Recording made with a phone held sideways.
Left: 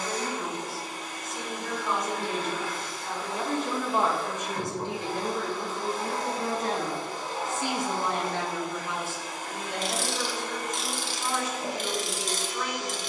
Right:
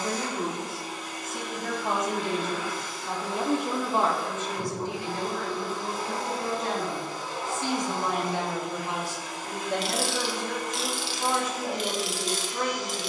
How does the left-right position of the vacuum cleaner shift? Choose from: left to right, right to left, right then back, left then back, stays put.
stays put.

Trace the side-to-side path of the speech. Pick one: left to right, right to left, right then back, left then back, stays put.
left then back.